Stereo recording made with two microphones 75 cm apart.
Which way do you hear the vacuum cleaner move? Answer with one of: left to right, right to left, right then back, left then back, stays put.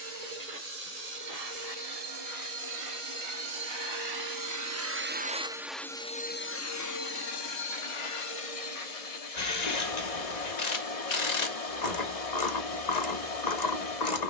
right to left.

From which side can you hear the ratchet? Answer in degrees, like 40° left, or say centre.
70° left.